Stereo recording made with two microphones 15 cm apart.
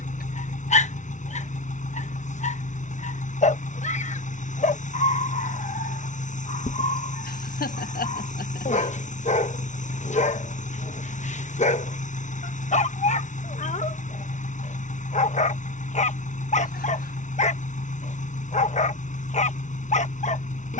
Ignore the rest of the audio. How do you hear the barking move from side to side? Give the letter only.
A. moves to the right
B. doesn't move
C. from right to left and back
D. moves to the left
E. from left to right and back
B.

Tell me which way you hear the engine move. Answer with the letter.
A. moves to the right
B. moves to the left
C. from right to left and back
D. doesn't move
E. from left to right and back
D.